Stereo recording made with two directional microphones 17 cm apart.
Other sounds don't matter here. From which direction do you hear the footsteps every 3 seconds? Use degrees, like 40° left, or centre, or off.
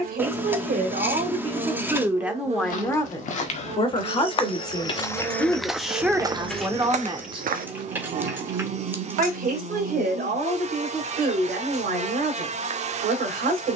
50° left, 20° left, 40° right, off, off.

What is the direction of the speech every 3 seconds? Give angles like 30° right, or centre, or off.
30° right, 20° left, 20° right, 60° right, 70° right.